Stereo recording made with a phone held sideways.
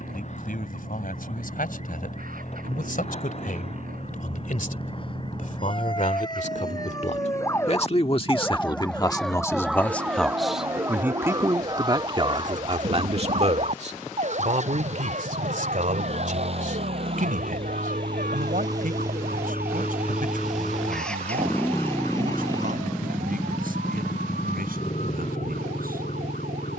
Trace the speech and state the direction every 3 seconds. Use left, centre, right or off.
left, left, left, centre, right, right, right, right, right.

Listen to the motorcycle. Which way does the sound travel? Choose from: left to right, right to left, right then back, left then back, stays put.
right to left.